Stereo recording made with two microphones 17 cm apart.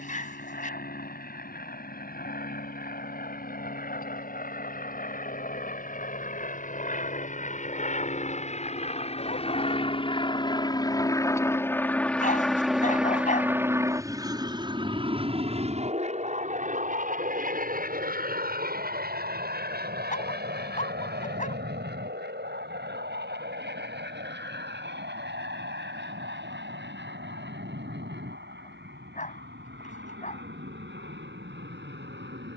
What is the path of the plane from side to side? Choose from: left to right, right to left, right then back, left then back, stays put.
left to right.